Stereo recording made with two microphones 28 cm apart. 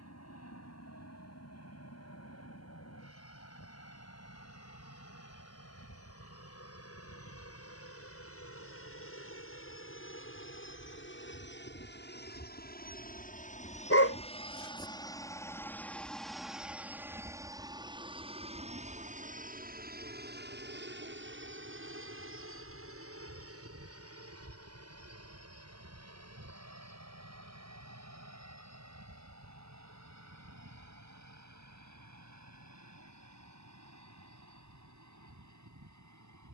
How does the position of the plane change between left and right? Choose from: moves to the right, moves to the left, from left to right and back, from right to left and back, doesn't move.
moves to the right.